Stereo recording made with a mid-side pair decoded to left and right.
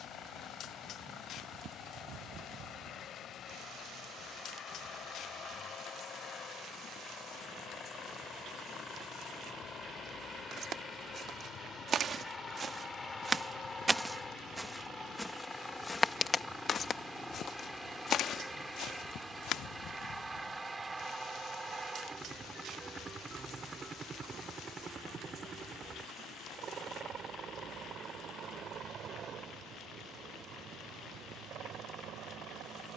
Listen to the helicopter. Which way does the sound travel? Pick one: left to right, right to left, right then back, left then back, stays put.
left to right.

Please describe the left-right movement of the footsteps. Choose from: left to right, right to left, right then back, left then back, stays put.
right to left.